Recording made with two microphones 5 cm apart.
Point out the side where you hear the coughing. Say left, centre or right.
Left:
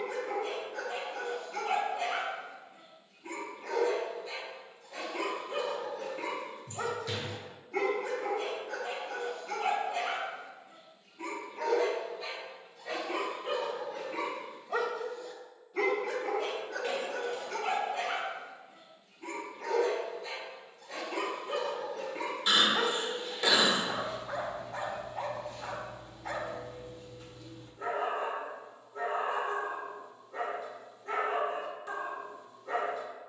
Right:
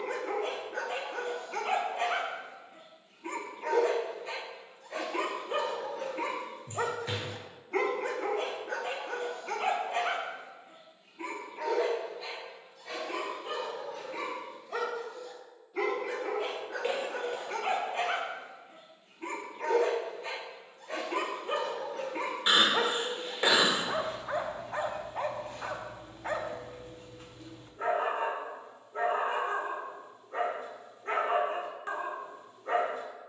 right.